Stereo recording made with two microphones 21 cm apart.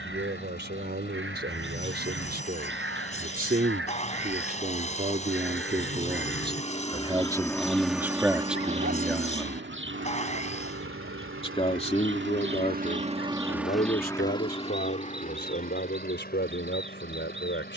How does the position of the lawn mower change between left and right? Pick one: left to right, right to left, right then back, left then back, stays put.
right then back.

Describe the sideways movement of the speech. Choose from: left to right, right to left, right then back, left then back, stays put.
right to left.